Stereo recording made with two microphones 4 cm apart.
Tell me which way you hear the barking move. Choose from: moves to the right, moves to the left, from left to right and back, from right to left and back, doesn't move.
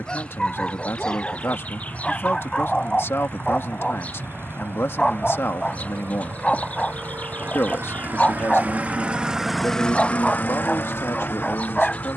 doesn't move.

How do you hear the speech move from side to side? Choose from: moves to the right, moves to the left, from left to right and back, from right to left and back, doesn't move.
doesn't move.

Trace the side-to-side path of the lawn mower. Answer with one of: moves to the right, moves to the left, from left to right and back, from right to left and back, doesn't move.
moves to the left.